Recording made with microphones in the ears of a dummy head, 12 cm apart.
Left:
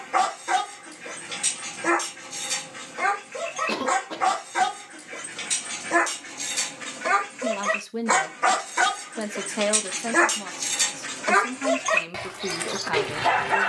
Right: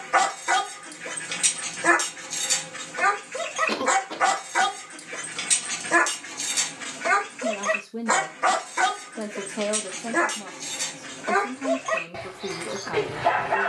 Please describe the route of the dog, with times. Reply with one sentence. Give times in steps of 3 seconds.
You can hear the dog on the right from 0 s, in the centre from 6 s and on the left from 9 s.